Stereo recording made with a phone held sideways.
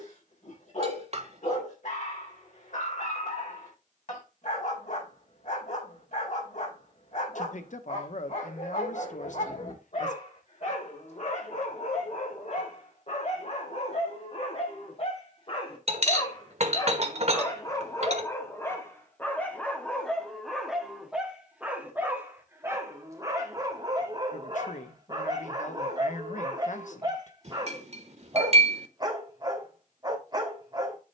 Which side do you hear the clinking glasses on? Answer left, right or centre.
right.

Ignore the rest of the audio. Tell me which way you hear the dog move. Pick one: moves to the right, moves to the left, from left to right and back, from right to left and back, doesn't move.
moves to the right.